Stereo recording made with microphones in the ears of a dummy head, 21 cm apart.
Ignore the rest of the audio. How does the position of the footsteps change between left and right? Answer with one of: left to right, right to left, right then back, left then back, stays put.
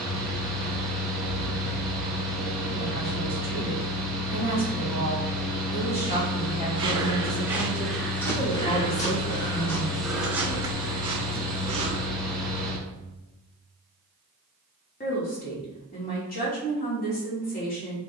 left then back.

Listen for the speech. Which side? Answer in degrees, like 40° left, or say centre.
40° left.